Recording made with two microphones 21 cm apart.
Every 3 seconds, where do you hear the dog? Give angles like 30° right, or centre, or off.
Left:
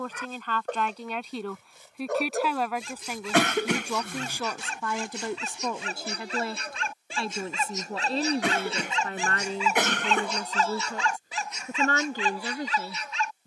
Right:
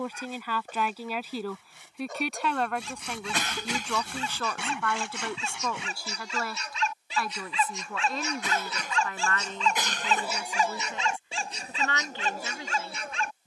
70° left, 70° left, 40° left, 10° right, 50° right.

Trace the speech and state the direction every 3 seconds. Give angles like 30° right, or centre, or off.
centre, 10° left, 30° left, 40° left, 40° left.